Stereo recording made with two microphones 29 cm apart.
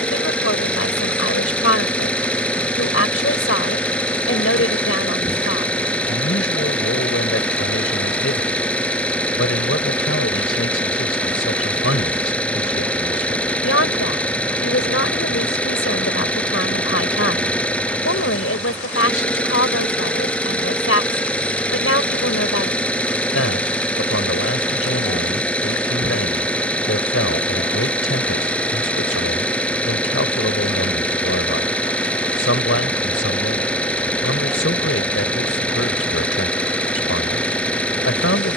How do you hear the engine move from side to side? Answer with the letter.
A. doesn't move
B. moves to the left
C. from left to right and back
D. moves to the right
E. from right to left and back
A.